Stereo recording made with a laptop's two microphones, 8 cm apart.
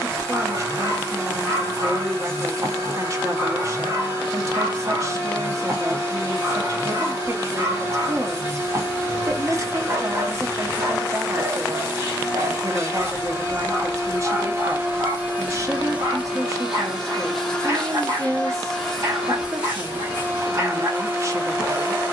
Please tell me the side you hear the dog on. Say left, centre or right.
right.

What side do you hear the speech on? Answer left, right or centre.
right.